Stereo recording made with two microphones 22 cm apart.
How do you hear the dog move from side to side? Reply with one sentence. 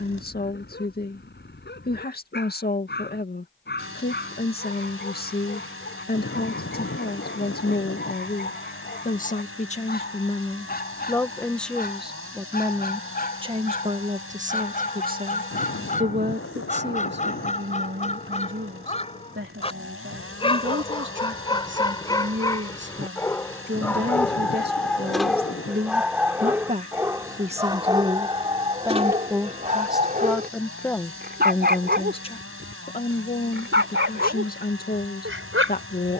In this clip you hear the dog travel towards the right.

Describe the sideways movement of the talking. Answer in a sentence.
In this clip you hear the talking go right and come back.